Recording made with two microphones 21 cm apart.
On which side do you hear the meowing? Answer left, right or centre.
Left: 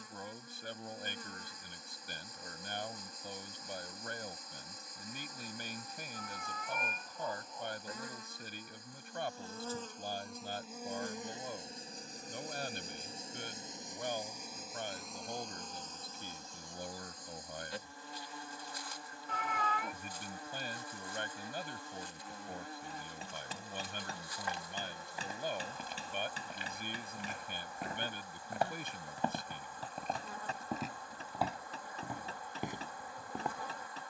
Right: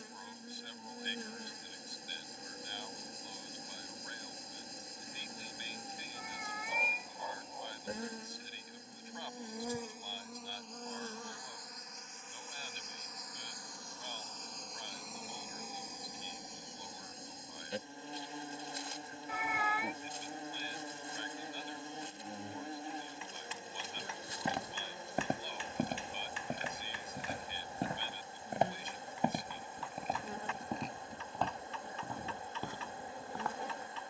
centre.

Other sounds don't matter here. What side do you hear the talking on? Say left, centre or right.
left.